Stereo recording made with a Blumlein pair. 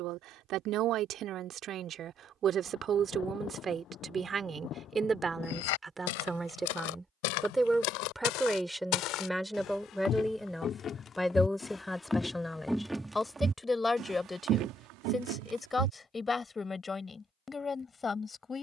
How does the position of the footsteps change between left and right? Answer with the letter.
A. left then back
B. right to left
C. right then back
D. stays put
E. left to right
E.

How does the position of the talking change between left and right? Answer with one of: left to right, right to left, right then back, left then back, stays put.
right to left.